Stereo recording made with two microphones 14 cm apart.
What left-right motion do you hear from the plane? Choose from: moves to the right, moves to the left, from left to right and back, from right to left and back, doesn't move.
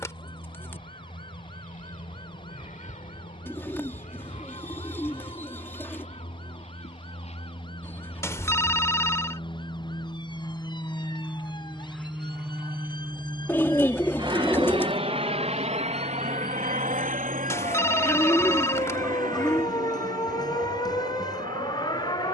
moves to the right.